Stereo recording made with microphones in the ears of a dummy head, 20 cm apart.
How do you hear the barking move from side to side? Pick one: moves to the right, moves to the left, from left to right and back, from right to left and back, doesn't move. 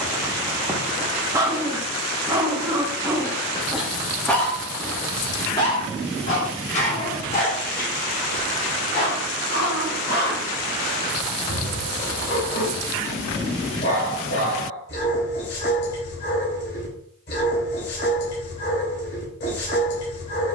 moves to the left.